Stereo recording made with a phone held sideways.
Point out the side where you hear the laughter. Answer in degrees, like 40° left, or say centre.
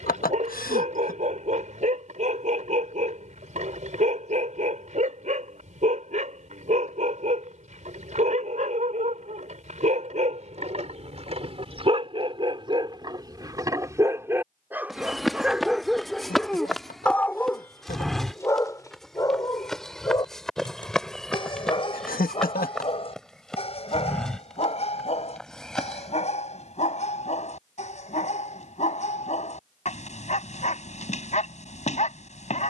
80° left.